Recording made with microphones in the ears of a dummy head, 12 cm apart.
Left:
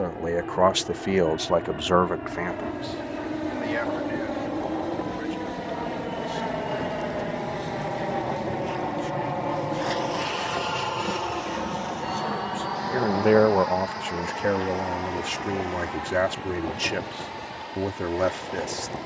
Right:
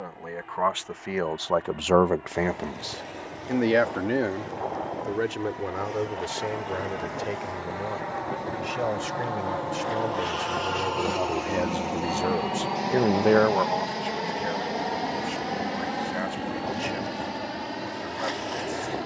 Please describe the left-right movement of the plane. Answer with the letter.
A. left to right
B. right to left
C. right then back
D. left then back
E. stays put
A.